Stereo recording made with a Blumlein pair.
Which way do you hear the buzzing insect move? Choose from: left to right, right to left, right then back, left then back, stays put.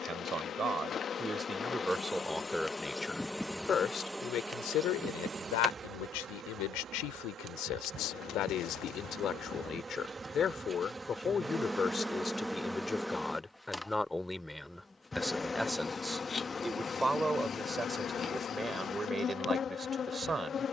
right then back.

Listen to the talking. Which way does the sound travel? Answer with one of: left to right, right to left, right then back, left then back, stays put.
left then back.